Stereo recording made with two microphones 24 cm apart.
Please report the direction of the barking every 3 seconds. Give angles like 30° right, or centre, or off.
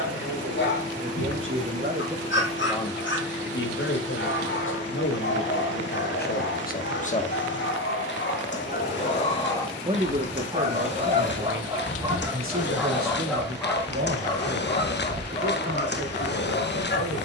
50° left, 50° left, 50° left, 10° right, 10° left, 40° left.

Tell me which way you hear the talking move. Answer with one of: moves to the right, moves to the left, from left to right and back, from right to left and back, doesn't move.
from right to left and back.